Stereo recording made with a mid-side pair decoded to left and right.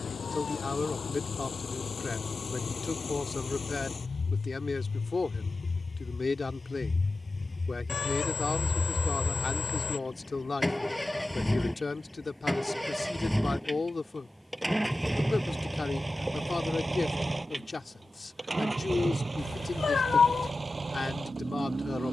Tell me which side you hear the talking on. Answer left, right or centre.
left.